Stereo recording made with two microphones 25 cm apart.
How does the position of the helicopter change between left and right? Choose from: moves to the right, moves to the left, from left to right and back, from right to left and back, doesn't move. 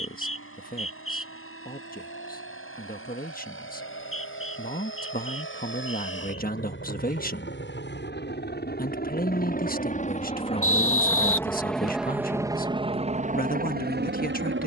moves to the right.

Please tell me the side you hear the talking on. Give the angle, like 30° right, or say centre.
40° left.